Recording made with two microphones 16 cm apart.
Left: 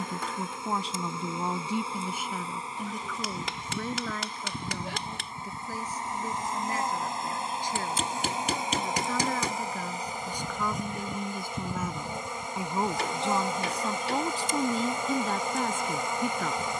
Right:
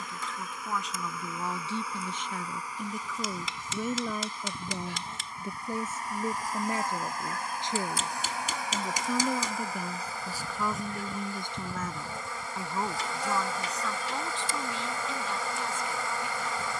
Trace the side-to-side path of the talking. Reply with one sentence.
In this clip you hear the talking go right and come back.